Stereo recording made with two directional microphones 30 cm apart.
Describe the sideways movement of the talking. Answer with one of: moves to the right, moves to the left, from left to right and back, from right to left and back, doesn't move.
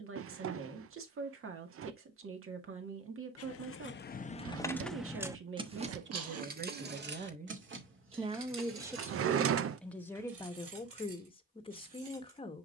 moves to the left.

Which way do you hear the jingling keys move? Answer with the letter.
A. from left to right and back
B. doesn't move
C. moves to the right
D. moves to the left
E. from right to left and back
C.